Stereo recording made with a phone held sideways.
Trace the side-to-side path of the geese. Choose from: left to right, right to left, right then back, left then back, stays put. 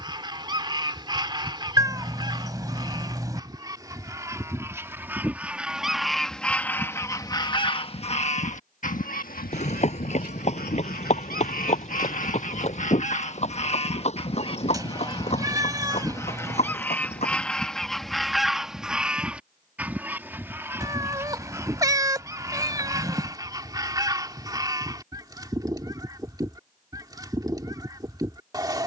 left then back.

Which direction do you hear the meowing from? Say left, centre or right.
right.